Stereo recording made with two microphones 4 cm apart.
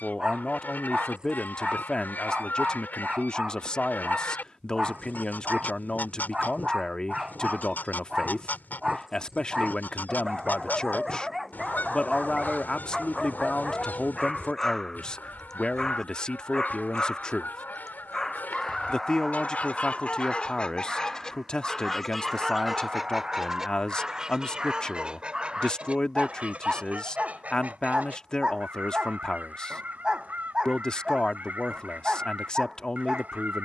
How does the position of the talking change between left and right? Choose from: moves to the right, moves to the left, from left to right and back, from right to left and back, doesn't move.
doesn't move.